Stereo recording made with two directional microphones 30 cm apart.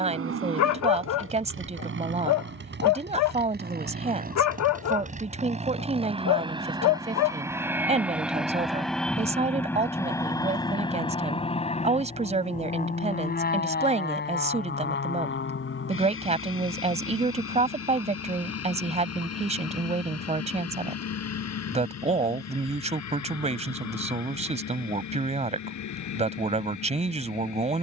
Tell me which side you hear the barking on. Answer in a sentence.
You can hear the barking on the left.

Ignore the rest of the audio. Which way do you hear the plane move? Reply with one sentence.
You can hear the plane move from right to left.